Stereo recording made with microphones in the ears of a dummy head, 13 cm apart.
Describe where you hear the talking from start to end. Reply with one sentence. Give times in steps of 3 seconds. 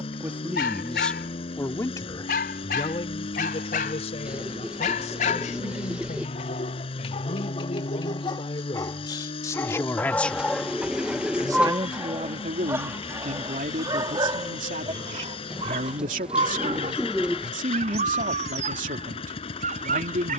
You can hear the talking in the centre from 0 s, on the left from 3 s, in the centre from 9 s and on the right from 12 s.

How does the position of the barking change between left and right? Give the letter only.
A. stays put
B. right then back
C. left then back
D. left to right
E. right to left
D.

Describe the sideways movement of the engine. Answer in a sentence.
In this clip you hear the engine stay in one place.